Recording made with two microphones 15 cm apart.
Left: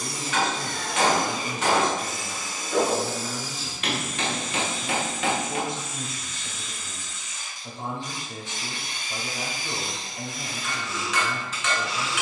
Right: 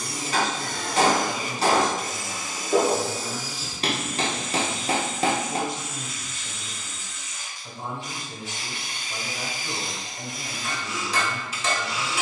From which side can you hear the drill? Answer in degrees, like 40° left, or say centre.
10° right.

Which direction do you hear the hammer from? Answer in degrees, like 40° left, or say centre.
40° right.